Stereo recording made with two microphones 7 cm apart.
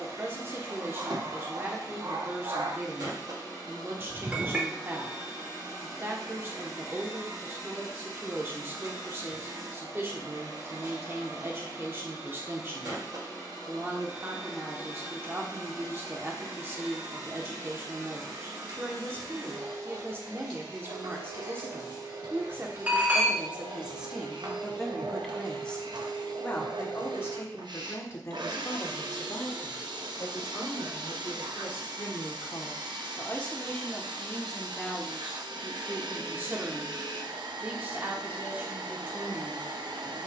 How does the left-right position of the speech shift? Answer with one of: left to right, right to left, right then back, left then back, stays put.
left then back.